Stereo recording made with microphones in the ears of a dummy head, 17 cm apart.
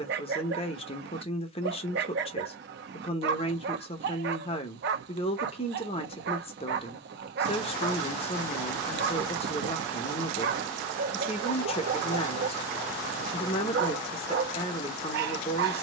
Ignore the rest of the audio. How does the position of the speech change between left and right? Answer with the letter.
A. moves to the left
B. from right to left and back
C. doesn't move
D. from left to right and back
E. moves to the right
C.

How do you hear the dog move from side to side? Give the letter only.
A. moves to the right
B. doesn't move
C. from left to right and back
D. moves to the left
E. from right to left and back
B.